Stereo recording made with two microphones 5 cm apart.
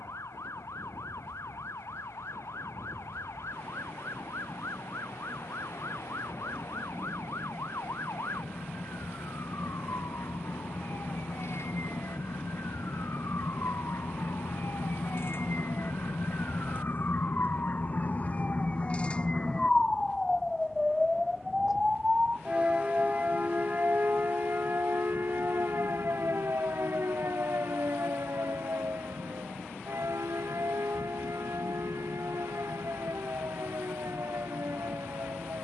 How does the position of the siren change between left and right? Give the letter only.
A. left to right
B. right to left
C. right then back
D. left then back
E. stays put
A.